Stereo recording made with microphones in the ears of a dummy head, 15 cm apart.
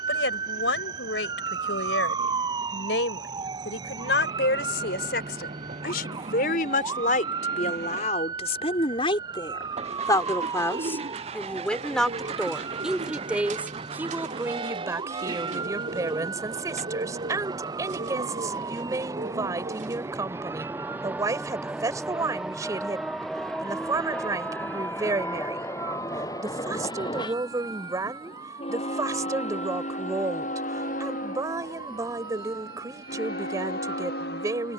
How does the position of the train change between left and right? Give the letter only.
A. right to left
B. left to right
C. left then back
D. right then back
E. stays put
A.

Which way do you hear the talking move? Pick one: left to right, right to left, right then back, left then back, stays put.
left to right.